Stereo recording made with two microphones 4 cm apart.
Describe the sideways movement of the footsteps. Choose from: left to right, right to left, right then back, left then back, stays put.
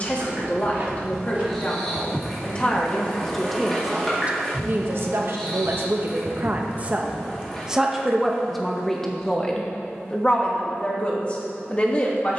right to left.